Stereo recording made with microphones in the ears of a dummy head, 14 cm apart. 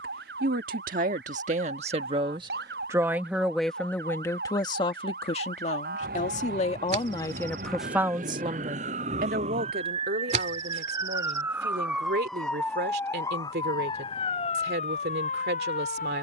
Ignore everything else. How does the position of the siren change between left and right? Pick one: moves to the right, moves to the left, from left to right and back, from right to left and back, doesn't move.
moves to the left.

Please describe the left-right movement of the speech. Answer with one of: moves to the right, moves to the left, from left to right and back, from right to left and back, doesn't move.
from right to left and back.